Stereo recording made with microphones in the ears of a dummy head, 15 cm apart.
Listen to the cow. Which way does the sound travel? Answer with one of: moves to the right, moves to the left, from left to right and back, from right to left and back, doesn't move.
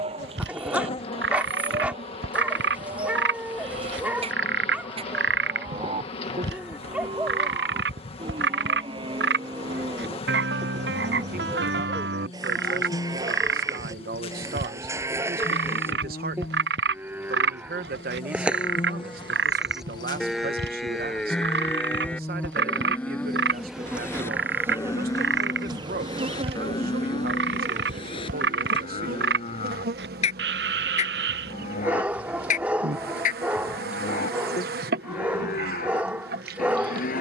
moves to the left.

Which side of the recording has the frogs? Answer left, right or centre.
right.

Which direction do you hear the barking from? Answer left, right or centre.
centre.